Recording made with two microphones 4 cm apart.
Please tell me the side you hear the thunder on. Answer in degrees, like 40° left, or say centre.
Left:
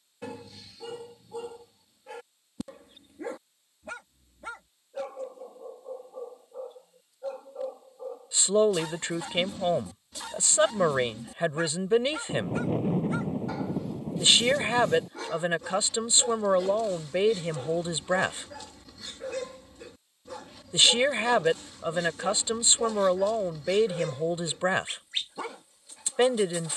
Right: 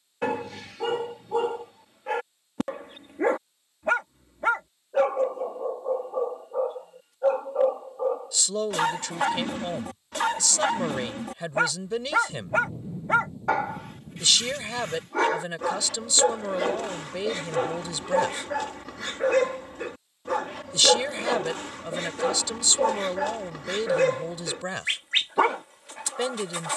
80° left.